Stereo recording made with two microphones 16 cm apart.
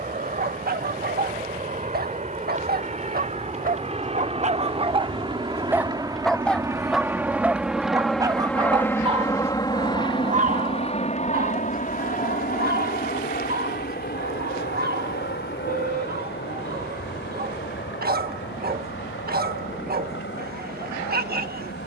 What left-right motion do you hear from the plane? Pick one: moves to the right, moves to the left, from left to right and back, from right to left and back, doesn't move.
moves to the left.